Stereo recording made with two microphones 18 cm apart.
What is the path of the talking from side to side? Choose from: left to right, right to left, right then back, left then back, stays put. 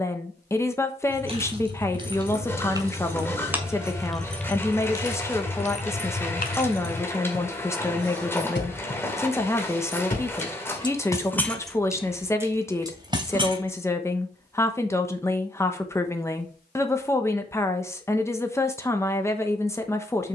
stays put.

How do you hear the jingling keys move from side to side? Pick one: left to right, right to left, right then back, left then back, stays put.
left then back.